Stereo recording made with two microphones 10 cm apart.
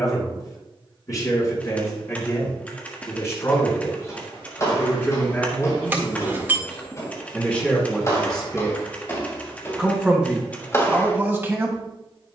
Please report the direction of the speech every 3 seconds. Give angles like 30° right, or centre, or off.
30° left, 30° left, 10° left, 10° right.